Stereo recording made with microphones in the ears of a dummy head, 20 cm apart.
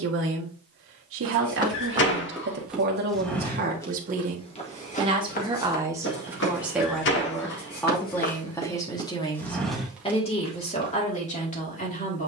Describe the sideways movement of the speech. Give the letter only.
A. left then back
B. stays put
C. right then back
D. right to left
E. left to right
D.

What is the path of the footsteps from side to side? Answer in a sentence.
In this clip you hear the footsteps go left and come back.